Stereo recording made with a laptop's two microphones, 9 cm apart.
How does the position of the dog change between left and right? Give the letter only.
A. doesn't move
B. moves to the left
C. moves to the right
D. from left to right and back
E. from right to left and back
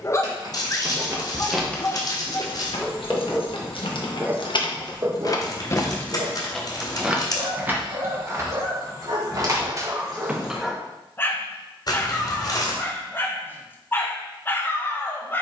D.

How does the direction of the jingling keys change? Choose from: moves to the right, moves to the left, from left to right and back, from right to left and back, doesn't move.
from right to left and back.